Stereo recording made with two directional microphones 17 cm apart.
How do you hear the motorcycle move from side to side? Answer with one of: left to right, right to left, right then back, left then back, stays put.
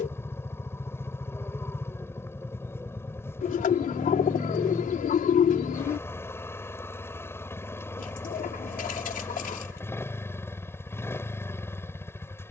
stays put.